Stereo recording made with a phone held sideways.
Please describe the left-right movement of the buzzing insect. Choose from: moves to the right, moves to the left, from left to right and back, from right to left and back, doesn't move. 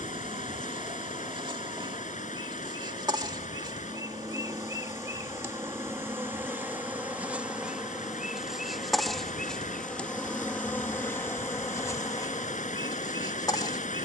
moves to the left.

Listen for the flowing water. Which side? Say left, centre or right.
left.